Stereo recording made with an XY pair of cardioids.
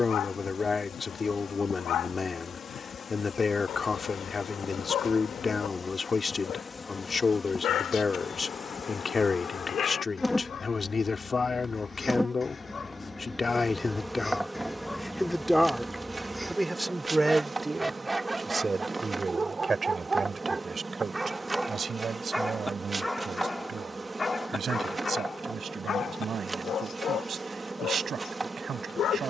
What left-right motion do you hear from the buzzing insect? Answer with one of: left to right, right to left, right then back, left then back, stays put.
left to right.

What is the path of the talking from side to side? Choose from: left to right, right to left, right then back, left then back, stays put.
left to right.